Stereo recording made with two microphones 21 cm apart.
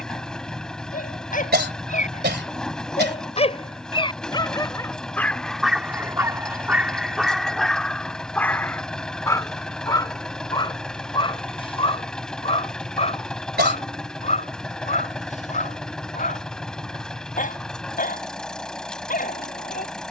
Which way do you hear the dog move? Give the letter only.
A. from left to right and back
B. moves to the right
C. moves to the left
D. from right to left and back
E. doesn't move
A.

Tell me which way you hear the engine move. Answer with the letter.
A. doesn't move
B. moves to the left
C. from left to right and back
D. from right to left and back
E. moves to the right
A.